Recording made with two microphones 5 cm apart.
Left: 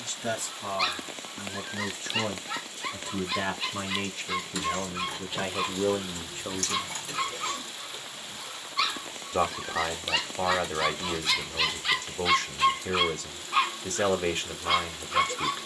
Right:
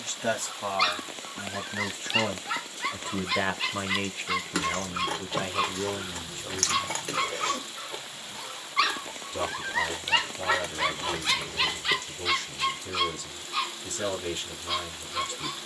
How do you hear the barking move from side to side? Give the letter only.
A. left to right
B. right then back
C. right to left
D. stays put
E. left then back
C.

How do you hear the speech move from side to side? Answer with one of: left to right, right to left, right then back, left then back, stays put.
right to left.